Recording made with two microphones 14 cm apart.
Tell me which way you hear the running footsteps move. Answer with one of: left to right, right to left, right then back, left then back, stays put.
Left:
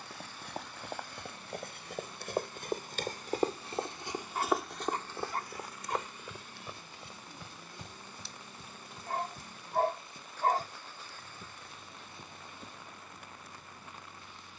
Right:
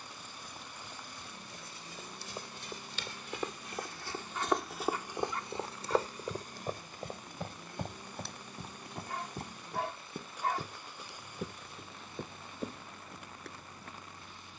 left to right.